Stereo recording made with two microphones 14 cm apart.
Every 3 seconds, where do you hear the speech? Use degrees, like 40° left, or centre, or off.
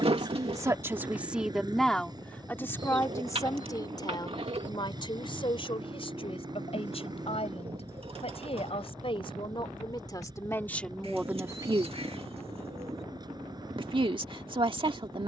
centre, 30° left, 50° left, 10° left, 40° right.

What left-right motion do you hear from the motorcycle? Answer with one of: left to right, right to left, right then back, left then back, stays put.
stays put.